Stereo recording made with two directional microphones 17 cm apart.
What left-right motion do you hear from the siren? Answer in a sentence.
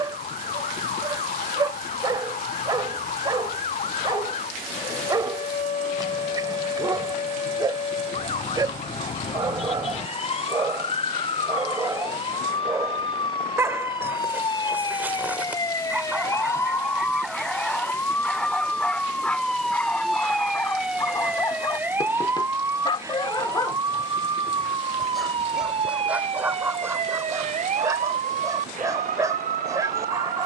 In this clip you hear the siren go from the left side to the right.